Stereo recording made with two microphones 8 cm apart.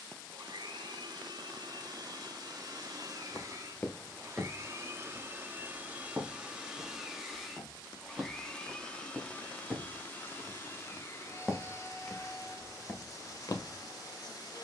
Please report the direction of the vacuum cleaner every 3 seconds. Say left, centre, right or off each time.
right, right, centre, left, left.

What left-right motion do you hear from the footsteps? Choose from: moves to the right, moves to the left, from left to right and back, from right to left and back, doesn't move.
from left to right and back.